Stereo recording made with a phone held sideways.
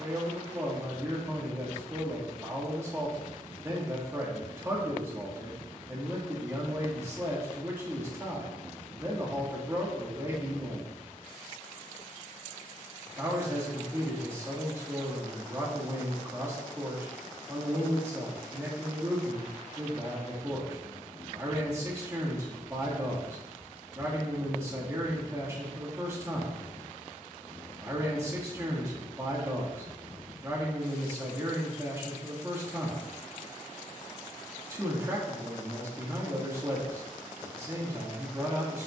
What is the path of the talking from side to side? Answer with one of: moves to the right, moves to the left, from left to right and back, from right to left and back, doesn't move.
doesn't move.